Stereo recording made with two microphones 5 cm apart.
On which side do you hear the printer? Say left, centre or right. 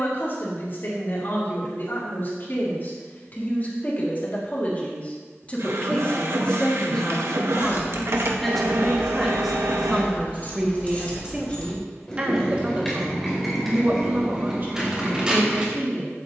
right.